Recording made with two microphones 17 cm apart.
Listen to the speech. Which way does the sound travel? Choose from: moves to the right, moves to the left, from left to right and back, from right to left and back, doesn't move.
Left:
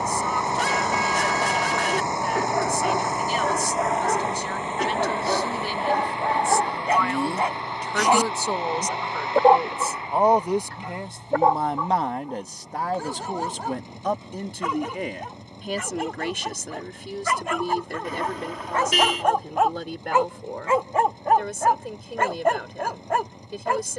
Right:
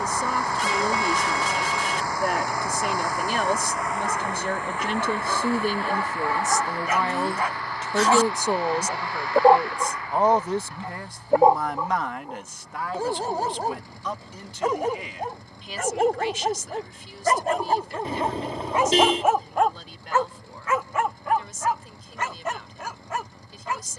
moves to the left.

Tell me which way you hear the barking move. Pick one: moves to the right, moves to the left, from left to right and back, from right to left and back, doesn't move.
from left to right and back.